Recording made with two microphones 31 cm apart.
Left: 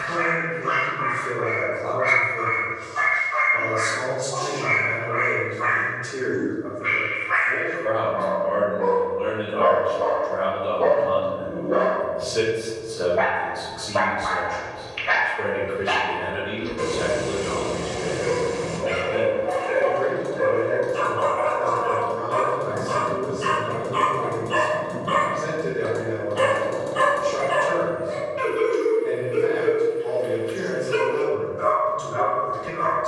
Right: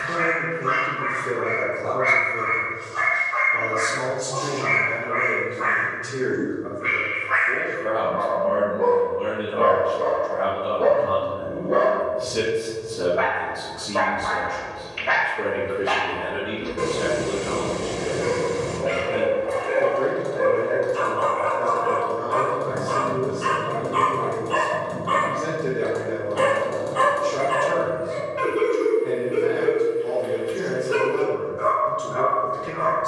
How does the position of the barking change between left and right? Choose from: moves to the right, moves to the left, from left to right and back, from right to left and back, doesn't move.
from right to left and back.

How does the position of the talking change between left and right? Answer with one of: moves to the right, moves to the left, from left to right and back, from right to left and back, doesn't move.
from right to left and back.